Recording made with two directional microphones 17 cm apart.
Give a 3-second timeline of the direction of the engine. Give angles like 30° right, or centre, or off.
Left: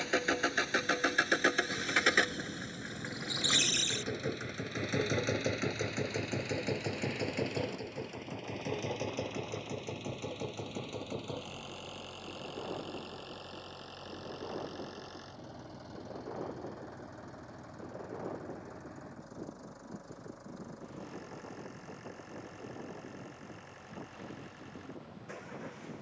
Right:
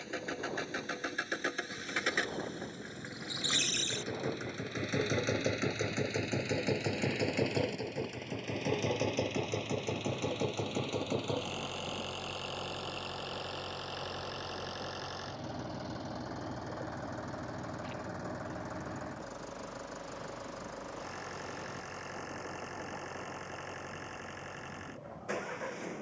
40° left, 10° left, 20° right, 30° right, 40° right, 40° right, 50° right, 50° right, 50° right.